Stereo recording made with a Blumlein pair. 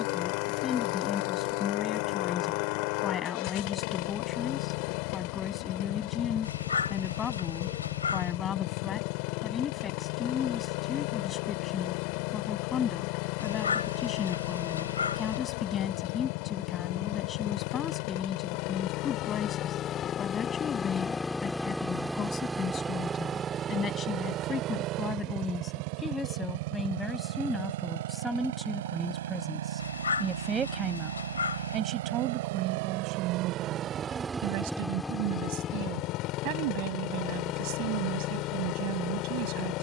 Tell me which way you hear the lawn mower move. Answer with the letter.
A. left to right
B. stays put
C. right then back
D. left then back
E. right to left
C.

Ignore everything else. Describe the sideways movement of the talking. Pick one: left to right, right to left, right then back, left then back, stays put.
left to right.